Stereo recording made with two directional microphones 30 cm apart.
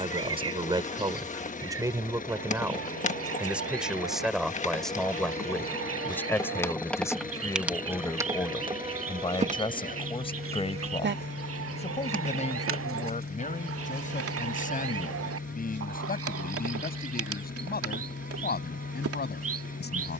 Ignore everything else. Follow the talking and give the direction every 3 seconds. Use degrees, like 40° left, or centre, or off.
10° right, centre, 10° left, 20° left, 20° left, 30° left, 30° left.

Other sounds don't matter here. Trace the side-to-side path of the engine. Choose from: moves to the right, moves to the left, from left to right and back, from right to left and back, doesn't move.
doesn't move.